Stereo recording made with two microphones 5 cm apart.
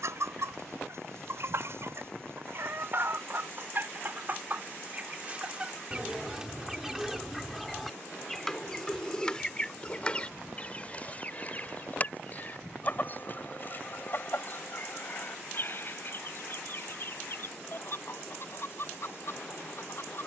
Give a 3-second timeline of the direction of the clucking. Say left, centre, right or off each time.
right, right, centre, left, left, left, left.